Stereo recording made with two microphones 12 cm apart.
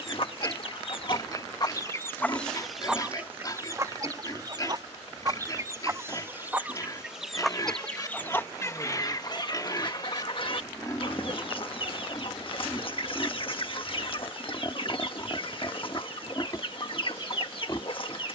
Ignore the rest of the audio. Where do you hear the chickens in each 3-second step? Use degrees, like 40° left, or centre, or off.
30° left, 30° right, centre, 50° left, 50° left, 50° left.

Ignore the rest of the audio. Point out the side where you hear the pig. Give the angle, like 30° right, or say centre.
30° left.